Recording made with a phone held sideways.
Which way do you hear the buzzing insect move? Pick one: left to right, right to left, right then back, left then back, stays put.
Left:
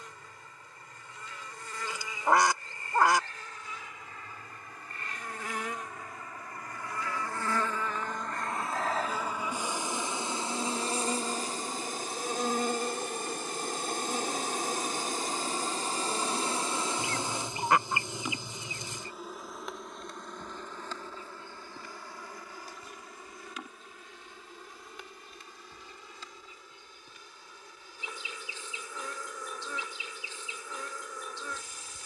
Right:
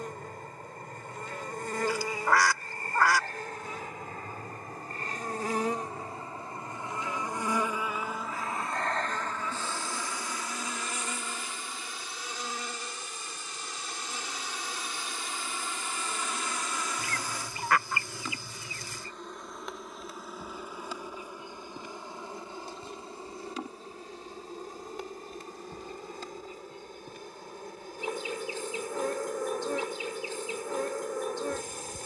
left then back.